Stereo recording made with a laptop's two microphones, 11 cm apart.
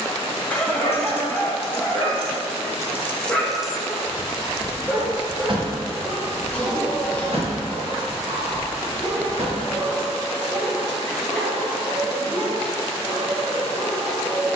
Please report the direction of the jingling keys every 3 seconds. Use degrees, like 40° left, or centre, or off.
60° left, 30° right, 60° right, 70° right, off.